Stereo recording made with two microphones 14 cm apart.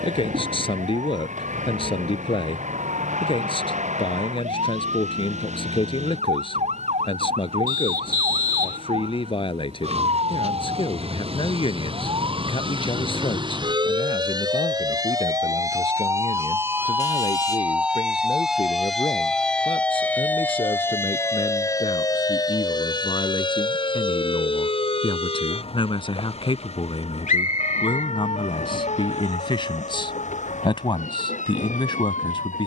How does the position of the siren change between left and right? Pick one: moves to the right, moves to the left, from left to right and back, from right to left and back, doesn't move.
moves to the left.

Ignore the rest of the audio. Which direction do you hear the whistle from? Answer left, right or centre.
left.